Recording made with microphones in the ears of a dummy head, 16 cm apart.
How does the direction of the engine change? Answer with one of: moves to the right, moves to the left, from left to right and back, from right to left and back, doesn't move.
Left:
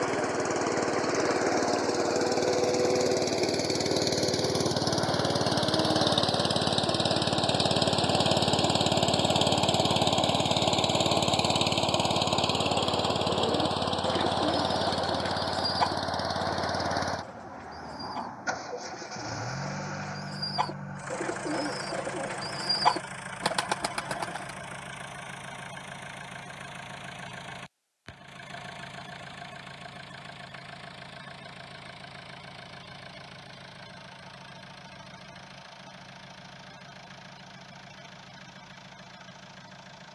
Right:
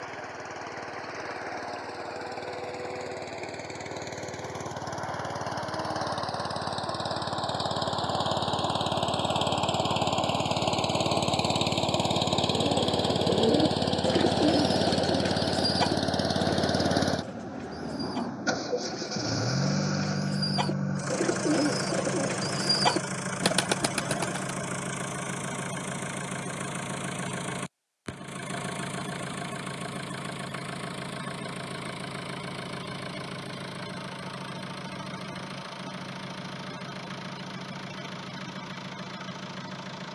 moves to the right.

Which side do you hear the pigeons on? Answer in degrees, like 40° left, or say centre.
30° right.